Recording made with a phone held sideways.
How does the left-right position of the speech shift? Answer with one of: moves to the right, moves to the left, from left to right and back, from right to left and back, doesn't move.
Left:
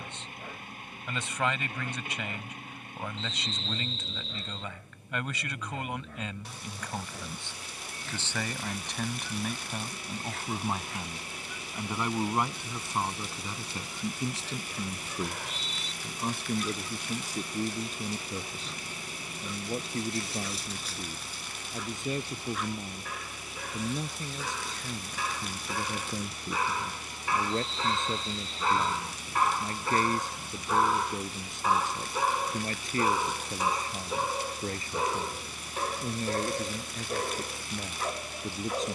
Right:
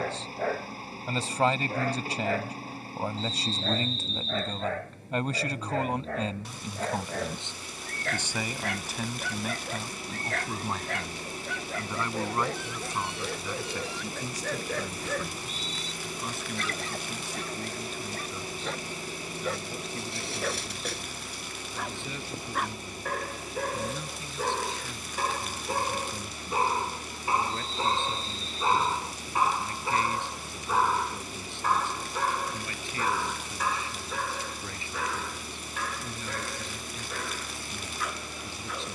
moves to the left.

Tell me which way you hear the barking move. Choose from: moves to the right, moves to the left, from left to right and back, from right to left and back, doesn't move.
moves to the left.